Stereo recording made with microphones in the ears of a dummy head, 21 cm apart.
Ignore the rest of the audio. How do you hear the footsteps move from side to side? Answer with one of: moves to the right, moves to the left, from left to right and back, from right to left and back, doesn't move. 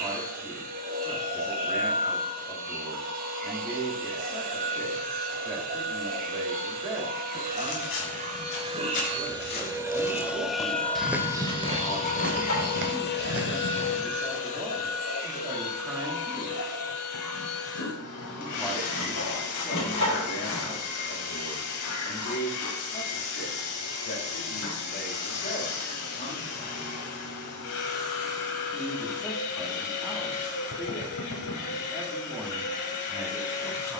moves to the right.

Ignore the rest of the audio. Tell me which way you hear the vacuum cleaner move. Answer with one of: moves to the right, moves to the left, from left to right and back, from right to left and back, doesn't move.
moves to the left.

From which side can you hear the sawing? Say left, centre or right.
left.